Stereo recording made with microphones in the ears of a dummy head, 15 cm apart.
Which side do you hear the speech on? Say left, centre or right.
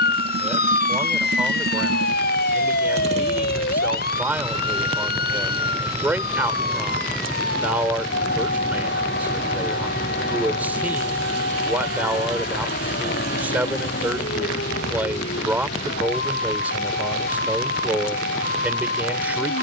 centre.